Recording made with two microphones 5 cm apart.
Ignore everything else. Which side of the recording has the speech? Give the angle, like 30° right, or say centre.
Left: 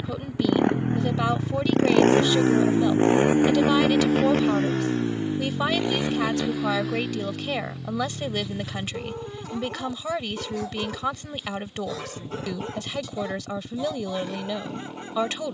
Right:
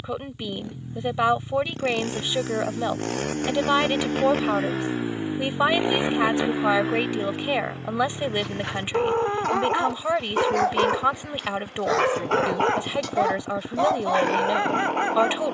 20° right.